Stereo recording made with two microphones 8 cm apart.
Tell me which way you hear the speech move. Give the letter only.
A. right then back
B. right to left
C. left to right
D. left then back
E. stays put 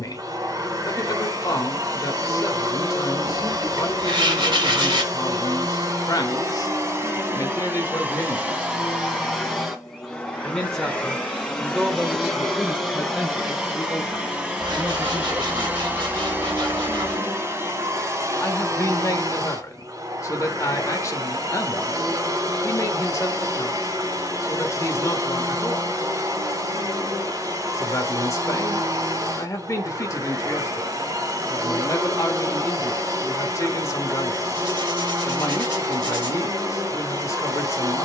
A.